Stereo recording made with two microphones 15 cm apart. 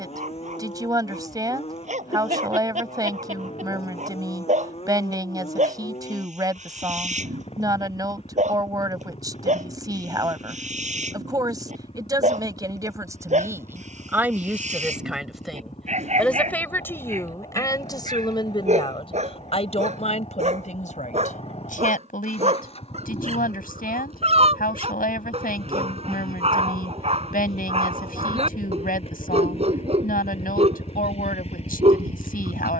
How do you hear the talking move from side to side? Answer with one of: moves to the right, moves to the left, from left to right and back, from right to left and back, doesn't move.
moves to the left.